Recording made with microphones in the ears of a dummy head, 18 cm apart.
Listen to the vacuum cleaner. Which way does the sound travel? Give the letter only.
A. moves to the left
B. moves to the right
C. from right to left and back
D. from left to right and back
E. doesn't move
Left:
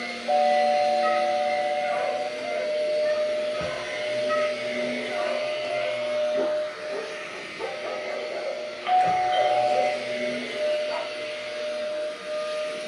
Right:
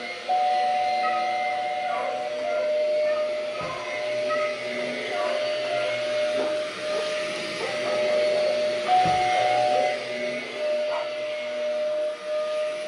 D.